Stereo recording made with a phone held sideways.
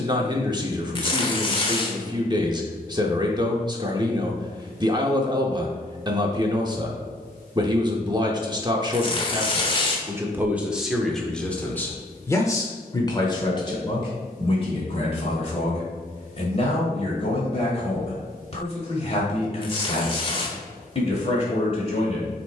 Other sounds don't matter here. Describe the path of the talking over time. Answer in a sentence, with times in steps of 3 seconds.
In this clip you hear the talking on the right from 0 s, in the centre from 9 s and on the left from 12 s.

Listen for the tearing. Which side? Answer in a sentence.
You can hear the tearing on the left.